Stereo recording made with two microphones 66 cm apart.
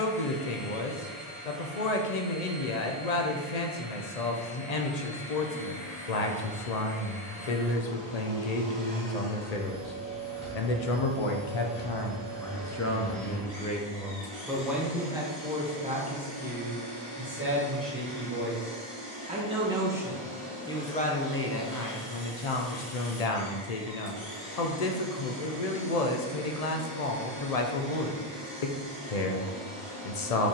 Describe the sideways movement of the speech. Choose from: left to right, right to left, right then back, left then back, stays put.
right then back.